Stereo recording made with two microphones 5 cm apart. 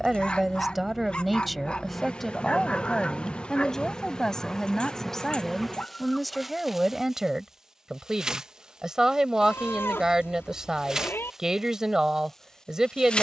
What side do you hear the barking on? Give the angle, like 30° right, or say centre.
30° left.